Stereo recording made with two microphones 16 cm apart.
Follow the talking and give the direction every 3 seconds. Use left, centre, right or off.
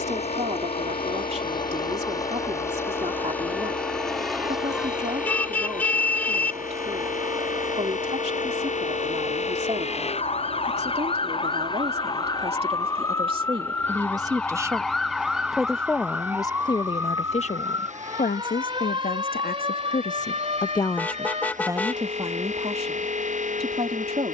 right, right, right, right, right, left, left, right.